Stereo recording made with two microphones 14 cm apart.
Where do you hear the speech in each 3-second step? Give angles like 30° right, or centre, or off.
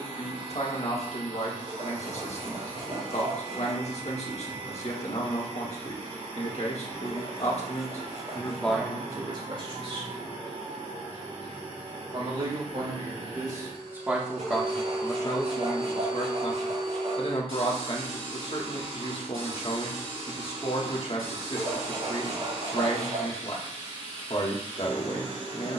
50° left, 50° left, 40° left, 40° right, 20° right, 40° left, 40° left, 40° left, 40° left.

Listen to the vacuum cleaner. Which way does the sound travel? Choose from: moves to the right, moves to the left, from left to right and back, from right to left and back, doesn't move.
doesn't move.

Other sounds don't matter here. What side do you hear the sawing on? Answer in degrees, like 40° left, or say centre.
60° right.